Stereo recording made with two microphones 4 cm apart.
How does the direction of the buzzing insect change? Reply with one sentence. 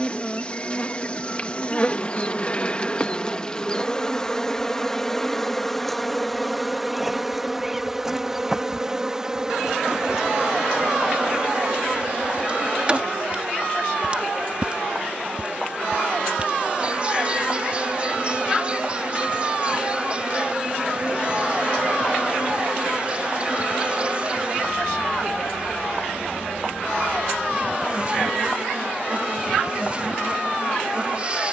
In this clip you hear the buzzing insect move to the right.